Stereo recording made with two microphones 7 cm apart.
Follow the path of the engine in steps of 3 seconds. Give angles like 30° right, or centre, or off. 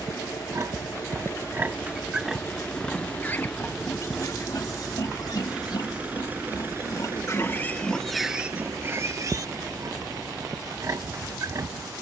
30° left, centre, 30° right, 50° right.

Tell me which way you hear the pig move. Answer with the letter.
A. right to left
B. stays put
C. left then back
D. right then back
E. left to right
C.